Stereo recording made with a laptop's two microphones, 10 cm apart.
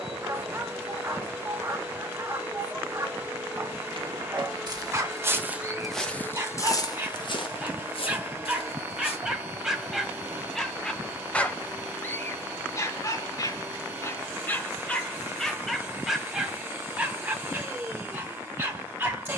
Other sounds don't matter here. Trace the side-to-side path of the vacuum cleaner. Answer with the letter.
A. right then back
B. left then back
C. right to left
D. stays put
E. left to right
D.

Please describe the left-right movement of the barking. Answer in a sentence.
You can hear the barking go left and come back.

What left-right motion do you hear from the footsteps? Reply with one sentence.
You can hear the footsteps go from the right side to the left.